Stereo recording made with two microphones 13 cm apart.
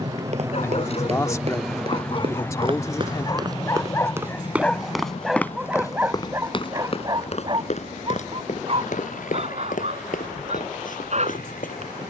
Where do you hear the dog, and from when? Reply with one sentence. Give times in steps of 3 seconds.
You can hear the dog on the left from 0 s, in the centre from 3 s and on the right from 6 s.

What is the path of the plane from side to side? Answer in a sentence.
You can hear the plane move from right to left.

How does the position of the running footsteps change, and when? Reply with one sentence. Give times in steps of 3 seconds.
You can hear the running footsteps on the right from 0 s, in the centre from 3 s and on the left from 6 s.